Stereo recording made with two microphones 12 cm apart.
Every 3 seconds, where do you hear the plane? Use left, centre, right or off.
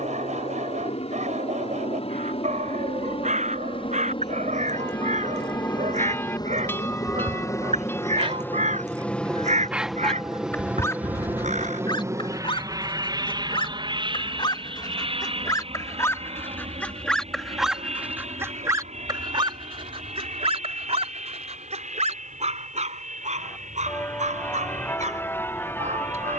left, left, left, centre, right, right, right, right, right.